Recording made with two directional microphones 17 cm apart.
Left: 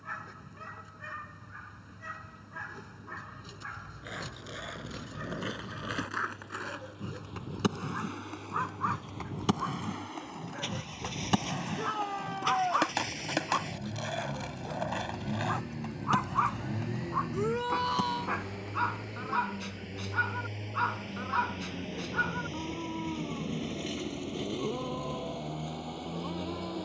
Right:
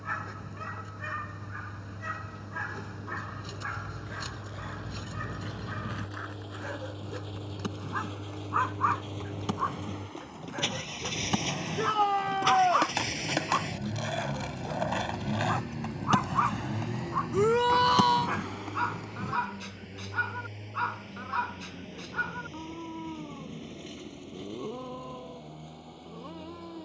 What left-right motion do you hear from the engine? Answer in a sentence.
You can hear the engine go from the right side to the left.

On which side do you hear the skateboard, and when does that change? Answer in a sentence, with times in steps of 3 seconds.
You can hear the skateboard not at all from 0 s, on the left from 3 s, in the centre from 12 s, on the right from 15 s and not at all from 21 s.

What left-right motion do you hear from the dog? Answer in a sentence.
You can hear the dog travel towards the left.